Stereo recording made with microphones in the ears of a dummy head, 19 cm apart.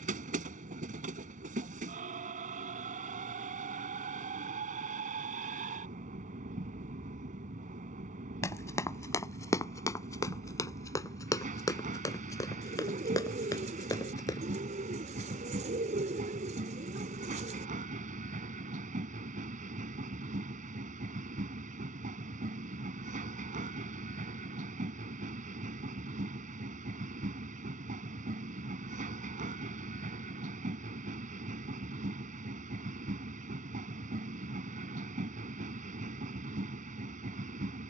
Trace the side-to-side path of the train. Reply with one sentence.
You can hear the train stay put.